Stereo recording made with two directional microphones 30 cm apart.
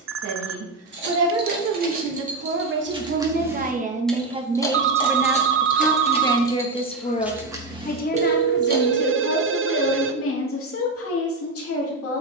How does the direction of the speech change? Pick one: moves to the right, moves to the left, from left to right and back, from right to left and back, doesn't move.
moves to the left.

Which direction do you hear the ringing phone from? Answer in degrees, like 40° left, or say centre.
40° right.